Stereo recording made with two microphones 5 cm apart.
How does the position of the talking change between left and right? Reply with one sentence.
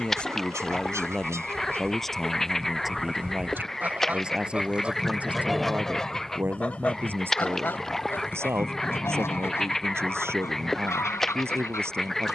In this clip you hear the talking move from left to right.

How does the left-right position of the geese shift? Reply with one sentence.
You can hear the geese move from right to left.